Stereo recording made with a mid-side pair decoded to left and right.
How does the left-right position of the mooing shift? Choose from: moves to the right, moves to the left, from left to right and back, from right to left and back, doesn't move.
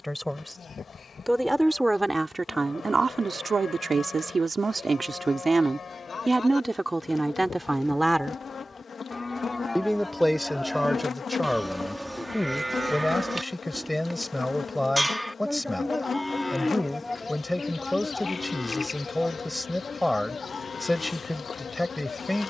from left to right and back.